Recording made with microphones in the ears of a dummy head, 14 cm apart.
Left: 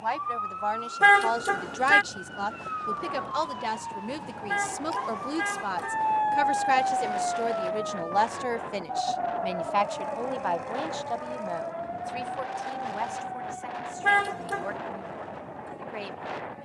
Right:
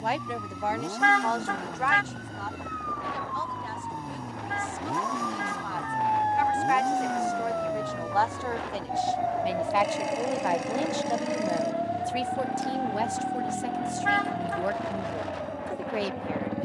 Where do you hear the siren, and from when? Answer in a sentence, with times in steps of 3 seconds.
In this clip you hear the siren on the left from 0 s, in the centre from 6 s and on the right from 9 s.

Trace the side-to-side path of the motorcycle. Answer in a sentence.
In this clip you hear the motorcycle stay put.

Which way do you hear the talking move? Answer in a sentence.
You can hear the talking go left and come back.